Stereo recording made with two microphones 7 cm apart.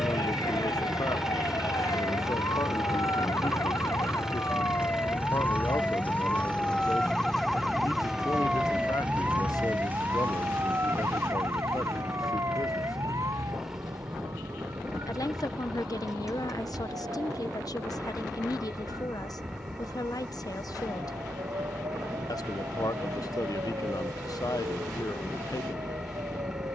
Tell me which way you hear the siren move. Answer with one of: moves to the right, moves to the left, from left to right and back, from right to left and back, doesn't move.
moves to the right.